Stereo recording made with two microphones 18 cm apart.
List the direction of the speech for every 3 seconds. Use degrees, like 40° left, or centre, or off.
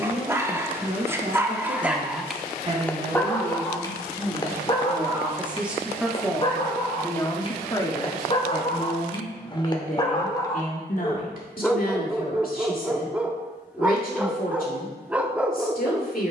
40° right, 20° right, 20° left, 50° left, 60° left, 60° left.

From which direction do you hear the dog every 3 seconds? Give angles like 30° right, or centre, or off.
10° right, 20° left, 30° left, 20° left, 10° right, 10° right.